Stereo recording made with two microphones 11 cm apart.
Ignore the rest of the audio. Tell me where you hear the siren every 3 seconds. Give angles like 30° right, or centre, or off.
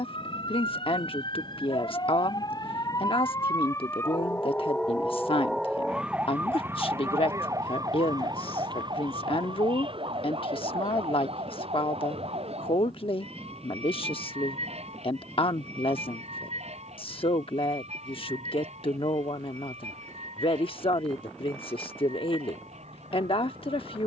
50° left, 10° left, 30° right, 50° right, 70° right, 70° right, 80° right, 80° right.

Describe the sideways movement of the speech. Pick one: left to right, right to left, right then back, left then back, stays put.
stays put.